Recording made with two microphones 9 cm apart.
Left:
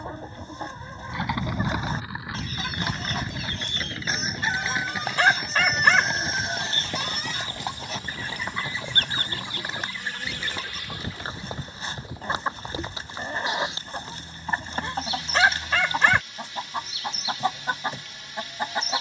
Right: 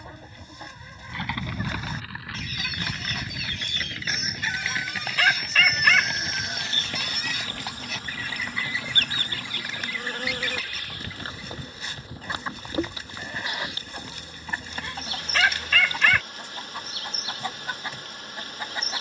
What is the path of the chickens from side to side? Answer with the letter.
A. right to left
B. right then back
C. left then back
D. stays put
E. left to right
D.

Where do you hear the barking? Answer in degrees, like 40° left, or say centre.
30° left.